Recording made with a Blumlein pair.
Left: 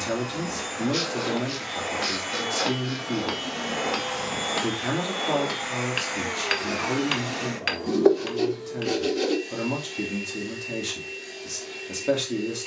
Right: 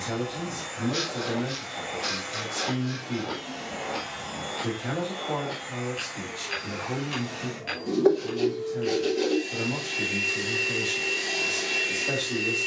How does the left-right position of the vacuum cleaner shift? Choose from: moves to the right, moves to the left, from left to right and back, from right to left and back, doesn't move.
moves to the right.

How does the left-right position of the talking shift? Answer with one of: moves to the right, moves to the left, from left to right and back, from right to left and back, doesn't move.
doesn't move.